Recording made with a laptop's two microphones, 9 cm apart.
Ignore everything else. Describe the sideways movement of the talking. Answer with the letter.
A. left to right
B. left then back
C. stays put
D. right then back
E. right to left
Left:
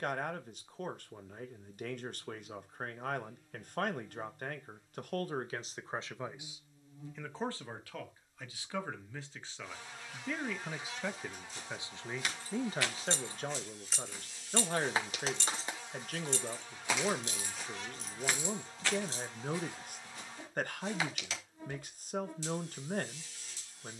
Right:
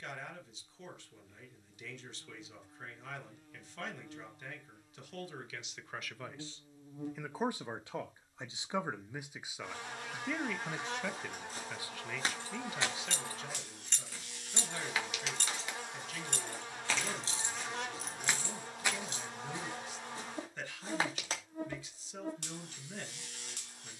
D.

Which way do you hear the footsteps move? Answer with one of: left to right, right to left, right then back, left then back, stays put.
left then back.